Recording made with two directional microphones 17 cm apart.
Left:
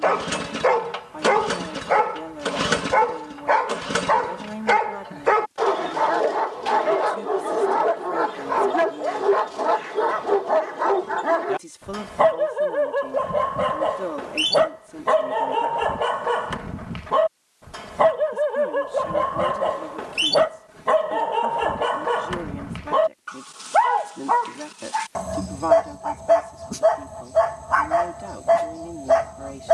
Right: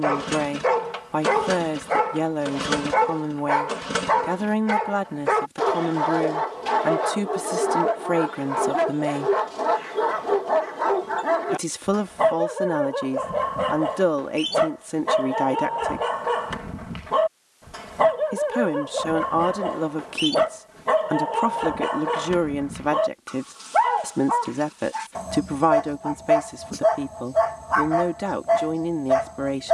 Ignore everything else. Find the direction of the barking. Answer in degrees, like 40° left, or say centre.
30° left.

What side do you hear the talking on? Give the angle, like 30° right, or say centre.
70° right.